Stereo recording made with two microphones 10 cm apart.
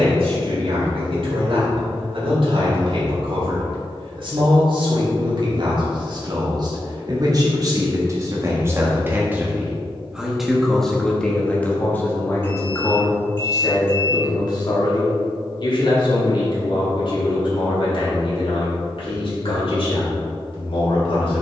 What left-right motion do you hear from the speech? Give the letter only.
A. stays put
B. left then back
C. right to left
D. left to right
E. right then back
C.